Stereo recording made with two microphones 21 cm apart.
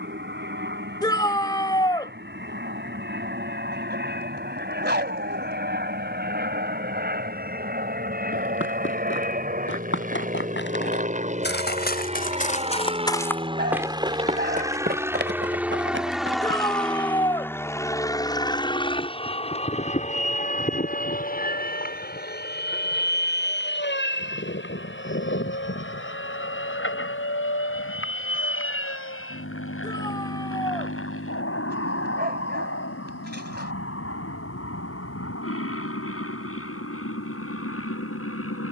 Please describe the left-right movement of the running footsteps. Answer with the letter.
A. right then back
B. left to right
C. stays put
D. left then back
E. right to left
B.